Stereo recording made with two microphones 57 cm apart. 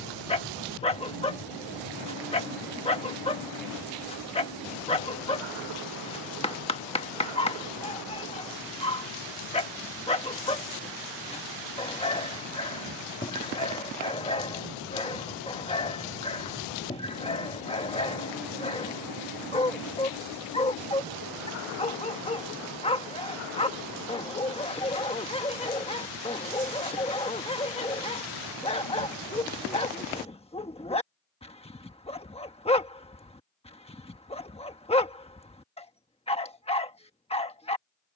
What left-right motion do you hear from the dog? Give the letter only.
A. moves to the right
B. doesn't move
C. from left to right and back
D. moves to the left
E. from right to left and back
B.